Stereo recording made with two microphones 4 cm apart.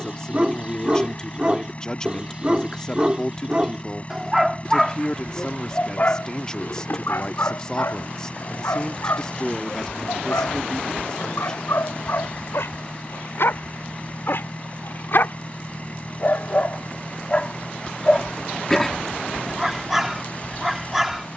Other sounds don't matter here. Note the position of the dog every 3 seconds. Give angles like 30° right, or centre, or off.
20° right, centre, 60° left, 70° left, 60° left, 40° left, centre.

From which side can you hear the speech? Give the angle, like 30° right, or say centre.
20° left.